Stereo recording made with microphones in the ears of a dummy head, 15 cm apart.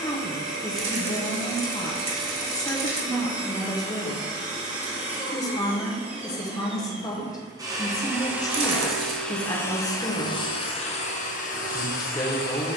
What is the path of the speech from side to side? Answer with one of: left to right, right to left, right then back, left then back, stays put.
stays put.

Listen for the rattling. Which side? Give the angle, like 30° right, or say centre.
30° right.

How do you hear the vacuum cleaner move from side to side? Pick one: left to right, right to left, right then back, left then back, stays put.
right to left.